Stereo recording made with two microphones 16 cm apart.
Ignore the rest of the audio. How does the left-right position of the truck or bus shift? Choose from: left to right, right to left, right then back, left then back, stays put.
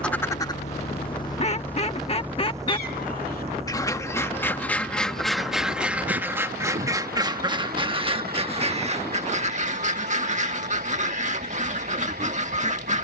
left to right.